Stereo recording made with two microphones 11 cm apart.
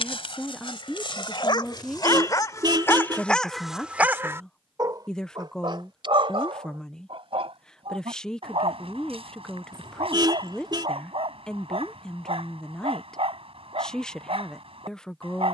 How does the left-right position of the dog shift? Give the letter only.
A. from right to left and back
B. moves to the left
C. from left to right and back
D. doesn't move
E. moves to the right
E.